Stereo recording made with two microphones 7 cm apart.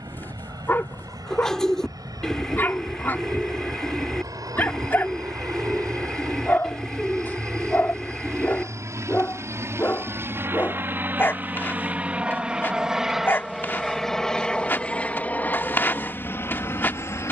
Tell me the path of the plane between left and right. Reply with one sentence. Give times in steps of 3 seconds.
You can hear the plane on the right from 0 s, in the centre from 12 s and on the left from 15 s.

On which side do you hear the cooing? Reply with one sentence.
In this clip you hear the cooing in the centre.